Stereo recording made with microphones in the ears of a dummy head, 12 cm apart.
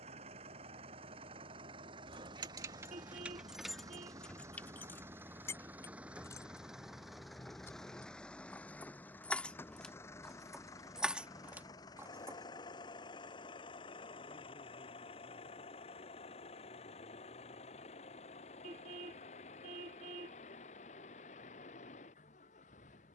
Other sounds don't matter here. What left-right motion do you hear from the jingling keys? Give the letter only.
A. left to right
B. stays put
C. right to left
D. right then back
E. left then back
E.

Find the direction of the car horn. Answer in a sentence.
In this clip you hear the car horn on the right.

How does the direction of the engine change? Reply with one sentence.
In this clip you hear the engine move from right to left.